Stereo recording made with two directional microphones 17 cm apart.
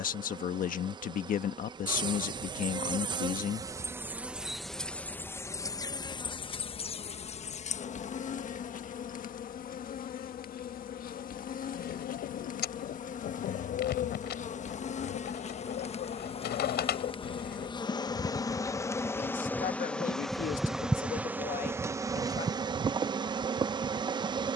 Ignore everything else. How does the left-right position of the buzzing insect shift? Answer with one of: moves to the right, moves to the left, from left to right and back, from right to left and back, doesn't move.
from right to left and back.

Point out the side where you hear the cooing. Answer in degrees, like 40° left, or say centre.
60° left.